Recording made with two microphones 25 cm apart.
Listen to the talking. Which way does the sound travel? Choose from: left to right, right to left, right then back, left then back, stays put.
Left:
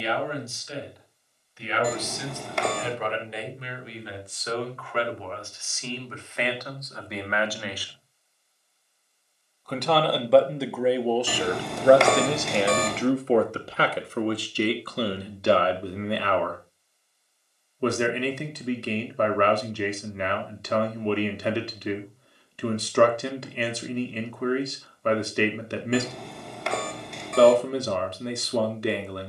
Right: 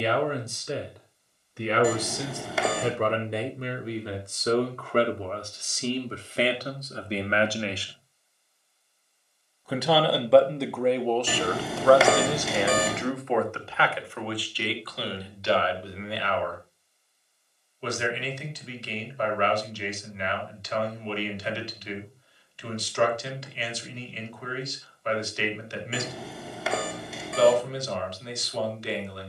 right to left.